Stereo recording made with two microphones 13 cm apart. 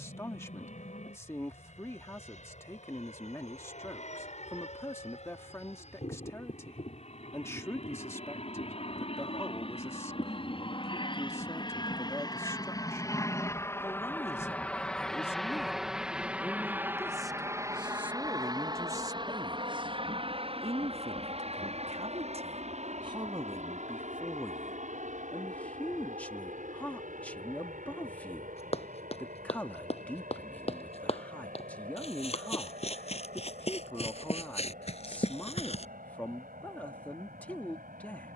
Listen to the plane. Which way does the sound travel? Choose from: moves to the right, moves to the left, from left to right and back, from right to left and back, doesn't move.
moves to the right.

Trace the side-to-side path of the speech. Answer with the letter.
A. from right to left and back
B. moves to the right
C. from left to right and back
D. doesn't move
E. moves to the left
C.